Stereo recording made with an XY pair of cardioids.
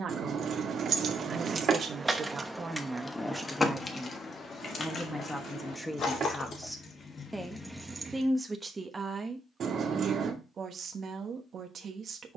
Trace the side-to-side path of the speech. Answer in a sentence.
You can hear the speech move from right to left and back again.